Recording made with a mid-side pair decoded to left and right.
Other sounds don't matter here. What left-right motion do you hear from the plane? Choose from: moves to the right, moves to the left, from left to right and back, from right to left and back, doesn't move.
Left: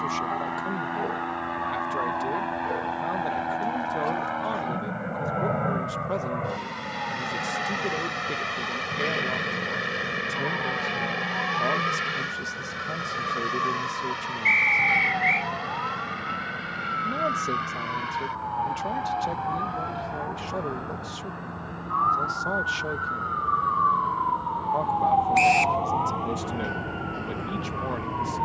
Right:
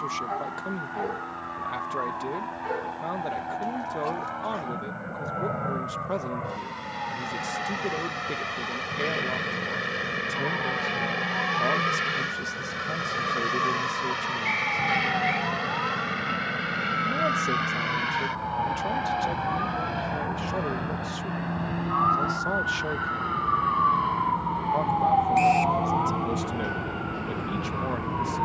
moves to the right.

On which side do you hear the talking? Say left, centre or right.
centre.